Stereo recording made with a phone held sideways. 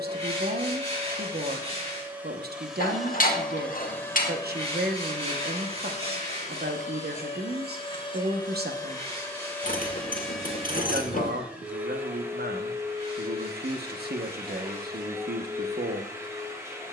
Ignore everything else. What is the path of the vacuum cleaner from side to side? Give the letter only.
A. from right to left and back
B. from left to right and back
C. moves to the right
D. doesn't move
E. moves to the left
A.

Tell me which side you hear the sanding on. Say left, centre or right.
right.